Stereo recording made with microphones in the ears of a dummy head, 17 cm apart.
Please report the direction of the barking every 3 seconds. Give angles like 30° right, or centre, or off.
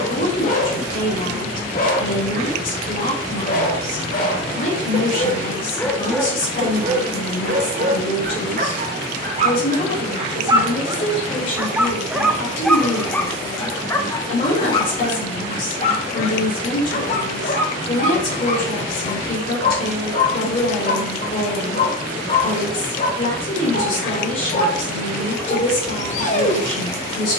50° left, 40° left, 30° right, 20° right, 10° left, 40° left, 40° left, 40° left, 40° left.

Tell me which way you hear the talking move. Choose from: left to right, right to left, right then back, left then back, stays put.
stays put.